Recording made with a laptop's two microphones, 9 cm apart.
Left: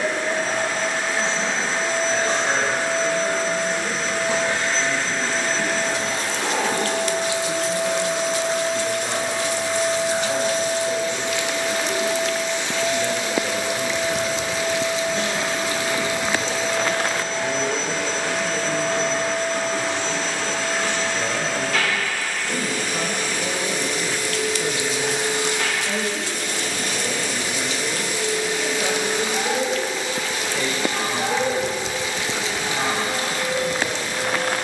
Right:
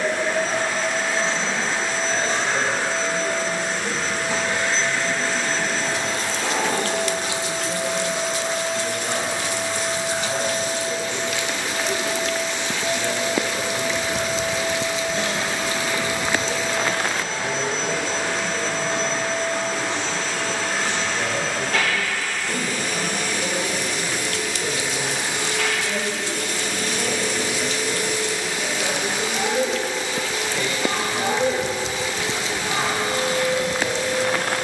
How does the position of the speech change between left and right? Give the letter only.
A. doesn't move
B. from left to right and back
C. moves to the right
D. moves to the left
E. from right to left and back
A.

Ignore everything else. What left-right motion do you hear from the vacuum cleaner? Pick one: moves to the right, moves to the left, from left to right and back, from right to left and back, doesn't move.
moves to the right.